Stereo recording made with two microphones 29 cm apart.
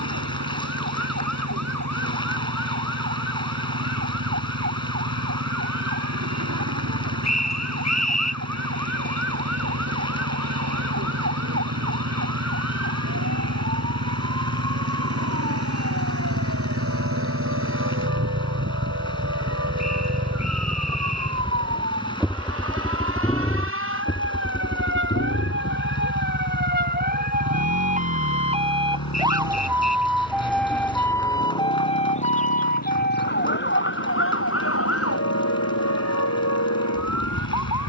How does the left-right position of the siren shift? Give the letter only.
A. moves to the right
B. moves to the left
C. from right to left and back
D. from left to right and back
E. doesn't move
B.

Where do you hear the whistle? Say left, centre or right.
left.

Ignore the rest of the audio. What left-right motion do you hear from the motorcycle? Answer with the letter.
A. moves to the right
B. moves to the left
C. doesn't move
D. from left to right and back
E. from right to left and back
B.